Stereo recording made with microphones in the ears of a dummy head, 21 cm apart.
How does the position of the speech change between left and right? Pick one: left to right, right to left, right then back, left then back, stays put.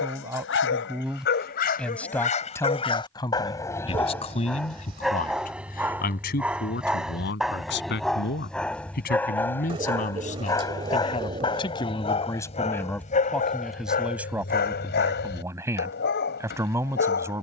left then back.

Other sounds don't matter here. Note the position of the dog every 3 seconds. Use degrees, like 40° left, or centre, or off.
40° left, centre, centre, 10° left, 30° left, 50° left.